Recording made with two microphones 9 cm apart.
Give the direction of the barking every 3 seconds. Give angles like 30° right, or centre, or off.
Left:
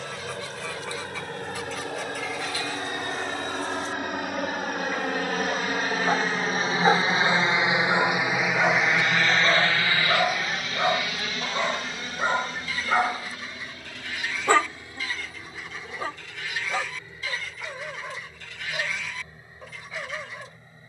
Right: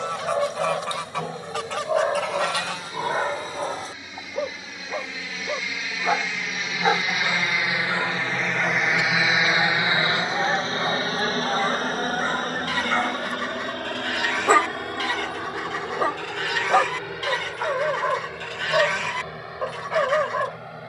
70° right, 40° right, 10° left, 30° left, centre, 50° right, 70° right.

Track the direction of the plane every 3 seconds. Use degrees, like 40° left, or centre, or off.
70° left, 60° left, 30° left, 30° right, 50° right, 60° right, 70° right.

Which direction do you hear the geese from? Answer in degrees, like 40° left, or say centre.
70° right.